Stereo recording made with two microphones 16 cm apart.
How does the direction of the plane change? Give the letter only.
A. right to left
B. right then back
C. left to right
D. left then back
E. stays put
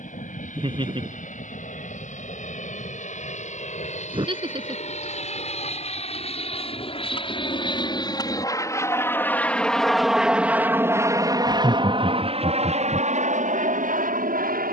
C.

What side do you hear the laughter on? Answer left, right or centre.
right.